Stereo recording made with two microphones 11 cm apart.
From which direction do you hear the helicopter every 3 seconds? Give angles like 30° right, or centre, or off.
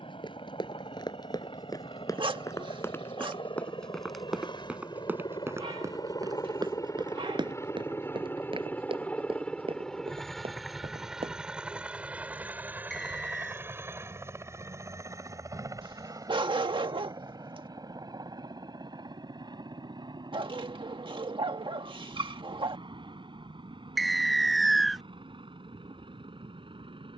70° left, 50° left, 30° left, centre, 20° right, 40° right, 40° right, 50° right, 50° right.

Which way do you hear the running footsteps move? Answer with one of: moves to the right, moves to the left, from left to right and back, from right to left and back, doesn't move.
moves to the right.